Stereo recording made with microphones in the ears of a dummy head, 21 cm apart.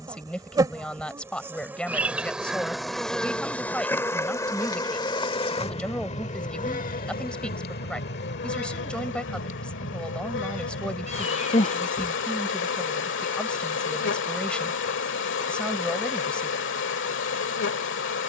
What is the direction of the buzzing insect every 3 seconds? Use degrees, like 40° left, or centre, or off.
10° right, 10° left, 40° left, 50° left, 50° left, 50° left.